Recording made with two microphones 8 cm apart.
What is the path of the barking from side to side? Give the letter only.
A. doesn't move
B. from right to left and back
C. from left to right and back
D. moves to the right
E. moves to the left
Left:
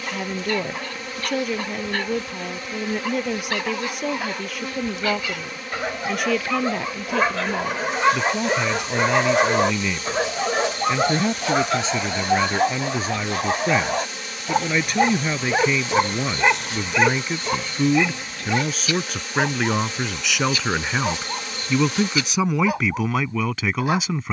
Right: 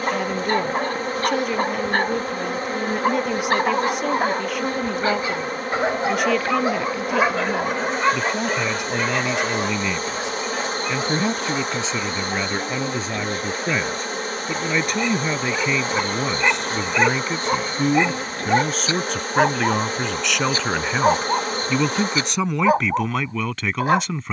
B.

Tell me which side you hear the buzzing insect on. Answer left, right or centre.
right.